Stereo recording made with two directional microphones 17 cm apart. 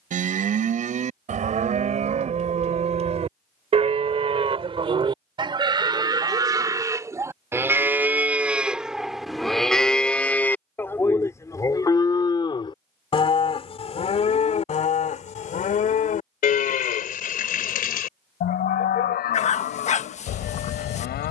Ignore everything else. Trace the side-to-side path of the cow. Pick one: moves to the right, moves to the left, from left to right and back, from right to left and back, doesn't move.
moves to the left.